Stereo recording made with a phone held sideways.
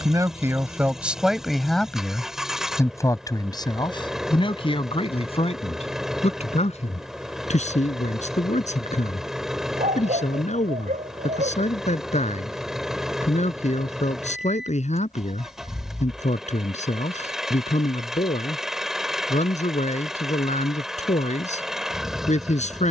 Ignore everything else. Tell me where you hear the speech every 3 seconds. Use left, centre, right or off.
centre, left, left, left, left, left, left, left.